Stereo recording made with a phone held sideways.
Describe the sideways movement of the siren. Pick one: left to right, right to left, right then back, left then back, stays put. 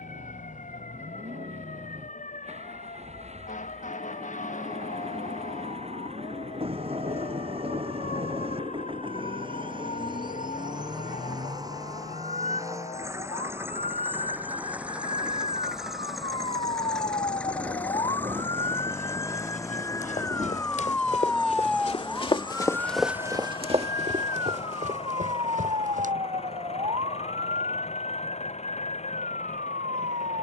left to right.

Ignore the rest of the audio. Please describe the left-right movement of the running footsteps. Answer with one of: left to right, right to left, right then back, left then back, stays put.
left to right.